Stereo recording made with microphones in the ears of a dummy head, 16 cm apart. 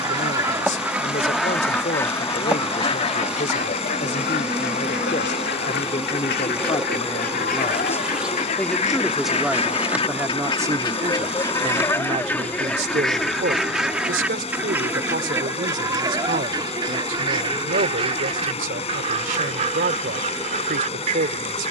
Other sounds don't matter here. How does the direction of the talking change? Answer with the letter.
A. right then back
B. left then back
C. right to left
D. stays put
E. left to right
E.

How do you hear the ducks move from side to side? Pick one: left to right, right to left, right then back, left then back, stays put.
left then back.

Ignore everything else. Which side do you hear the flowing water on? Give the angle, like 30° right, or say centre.
40° left.